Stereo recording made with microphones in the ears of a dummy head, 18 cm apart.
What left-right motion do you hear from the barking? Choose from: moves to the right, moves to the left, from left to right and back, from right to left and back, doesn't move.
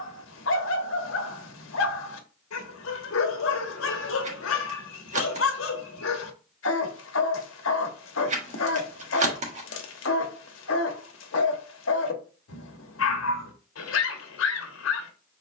doesn't move.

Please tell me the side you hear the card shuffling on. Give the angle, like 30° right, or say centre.
40° right.